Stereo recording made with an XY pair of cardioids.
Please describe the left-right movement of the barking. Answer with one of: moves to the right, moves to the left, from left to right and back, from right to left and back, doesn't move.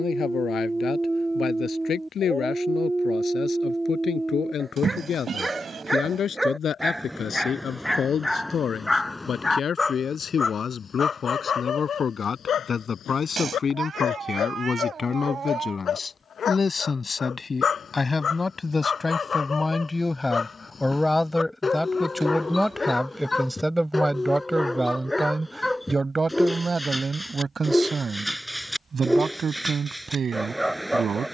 from right to left and back.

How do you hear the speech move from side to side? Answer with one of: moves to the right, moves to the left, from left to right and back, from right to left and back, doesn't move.
moves to the right.